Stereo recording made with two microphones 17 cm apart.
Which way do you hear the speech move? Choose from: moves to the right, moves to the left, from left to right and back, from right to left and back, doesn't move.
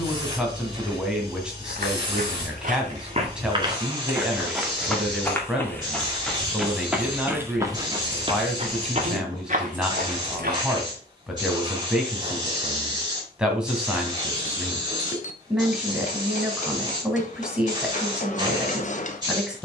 doesn't move.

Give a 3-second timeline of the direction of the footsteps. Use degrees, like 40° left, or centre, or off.
50° right, 10° right, 20° right, 50° right, off, off, off.